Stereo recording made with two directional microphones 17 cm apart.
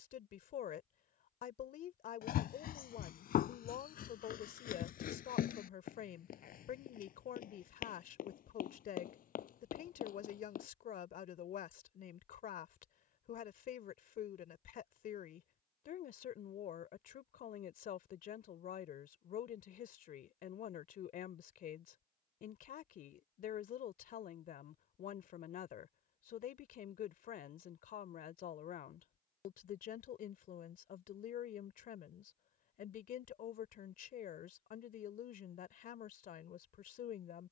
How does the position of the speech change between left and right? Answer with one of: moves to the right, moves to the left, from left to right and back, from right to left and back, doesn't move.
doesn't move.